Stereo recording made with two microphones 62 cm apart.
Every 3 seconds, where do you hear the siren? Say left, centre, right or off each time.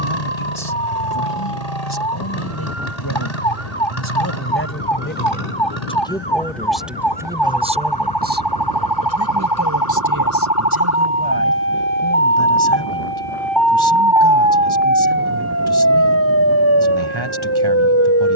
left, left, left, left, centre, right.